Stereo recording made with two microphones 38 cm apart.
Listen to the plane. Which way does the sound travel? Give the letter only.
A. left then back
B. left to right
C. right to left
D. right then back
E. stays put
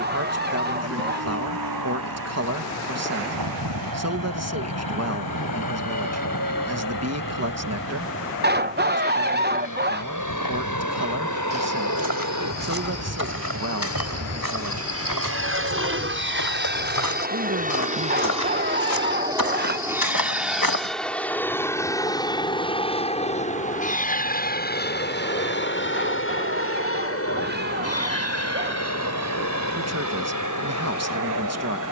C.